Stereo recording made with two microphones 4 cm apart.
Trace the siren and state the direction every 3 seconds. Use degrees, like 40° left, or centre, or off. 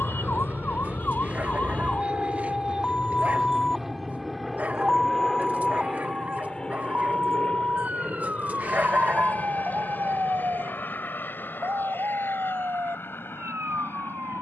40° left, centre, 40° right, 50° right, 60° right.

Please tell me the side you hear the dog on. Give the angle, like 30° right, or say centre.
40° right.